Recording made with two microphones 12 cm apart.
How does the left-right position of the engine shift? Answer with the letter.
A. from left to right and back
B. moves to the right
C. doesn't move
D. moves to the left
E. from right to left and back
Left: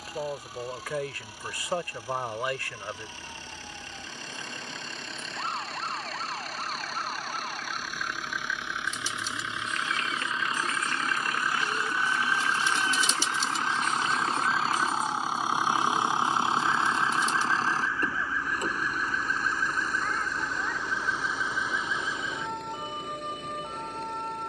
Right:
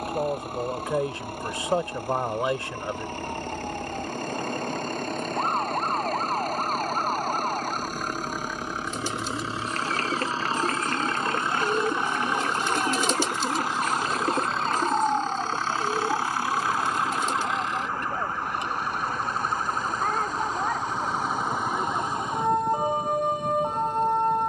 D.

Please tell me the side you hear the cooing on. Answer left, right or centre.
right.